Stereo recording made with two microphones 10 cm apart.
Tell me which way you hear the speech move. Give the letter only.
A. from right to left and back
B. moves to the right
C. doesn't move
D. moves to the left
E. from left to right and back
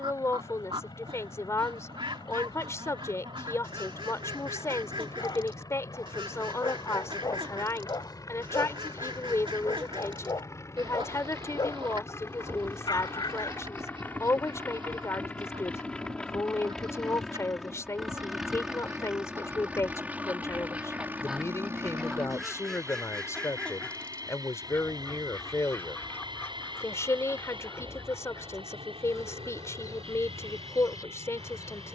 C.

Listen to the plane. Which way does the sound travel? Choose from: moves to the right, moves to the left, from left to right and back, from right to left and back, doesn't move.
moves to the right.